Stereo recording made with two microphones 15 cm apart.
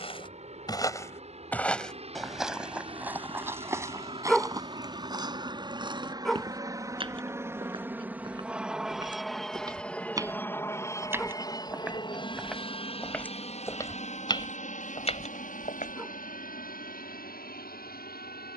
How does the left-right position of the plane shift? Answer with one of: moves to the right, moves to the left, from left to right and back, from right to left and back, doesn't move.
moves to the left.